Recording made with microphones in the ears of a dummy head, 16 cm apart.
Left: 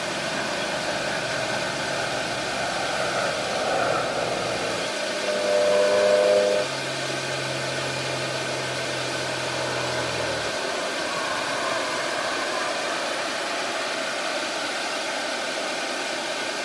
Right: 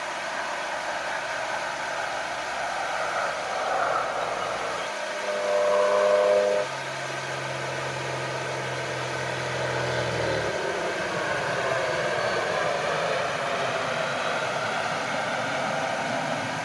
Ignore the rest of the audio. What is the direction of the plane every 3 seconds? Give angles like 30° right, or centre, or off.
40° left, 30° left, centre, 20° right, 50° right, 60° right.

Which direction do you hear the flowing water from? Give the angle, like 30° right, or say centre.
50° left.